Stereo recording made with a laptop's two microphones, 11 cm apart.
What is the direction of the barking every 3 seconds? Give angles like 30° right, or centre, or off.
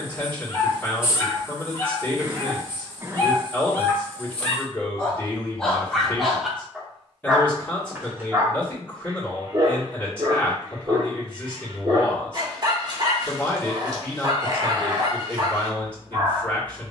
30° left, 20° left, 10° right, 40° right, 40° right, 40° right.